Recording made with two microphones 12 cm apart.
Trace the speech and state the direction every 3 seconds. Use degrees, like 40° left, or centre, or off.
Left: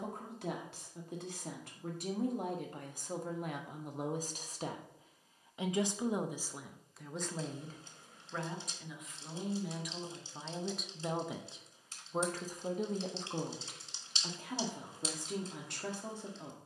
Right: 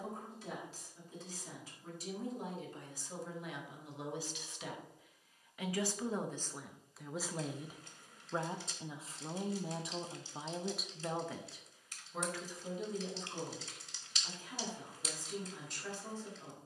60° left, 40° left, 10° right, 10° right, 60° left, 70° left.